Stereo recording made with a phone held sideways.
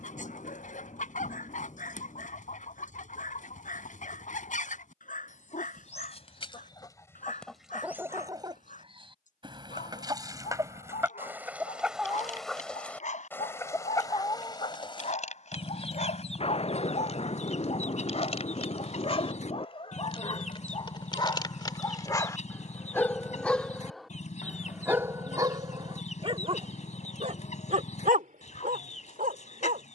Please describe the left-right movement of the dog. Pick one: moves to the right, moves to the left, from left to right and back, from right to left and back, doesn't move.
moves to the right.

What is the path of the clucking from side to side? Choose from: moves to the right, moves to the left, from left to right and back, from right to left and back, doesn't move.
from left to right and back.